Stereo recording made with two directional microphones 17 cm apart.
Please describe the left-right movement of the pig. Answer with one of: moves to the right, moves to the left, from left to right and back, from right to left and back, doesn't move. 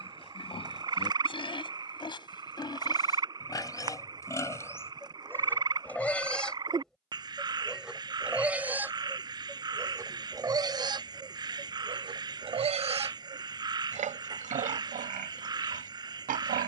moves to the right.